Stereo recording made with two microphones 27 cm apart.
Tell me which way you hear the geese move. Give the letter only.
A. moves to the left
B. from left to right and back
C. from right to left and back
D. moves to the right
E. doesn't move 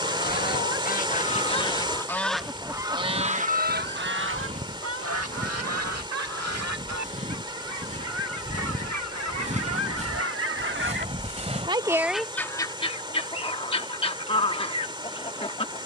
B.